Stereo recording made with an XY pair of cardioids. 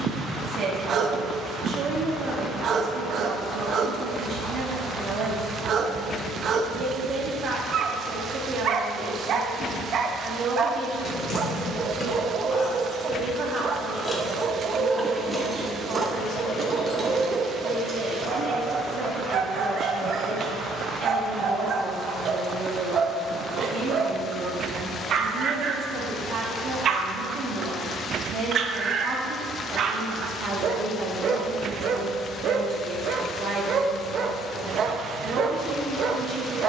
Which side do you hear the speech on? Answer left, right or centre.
right.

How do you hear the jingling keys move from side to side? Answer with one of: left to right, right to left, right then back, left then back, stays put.
left to right.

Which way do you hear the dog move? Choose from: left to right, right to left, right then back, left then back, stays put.
stays put.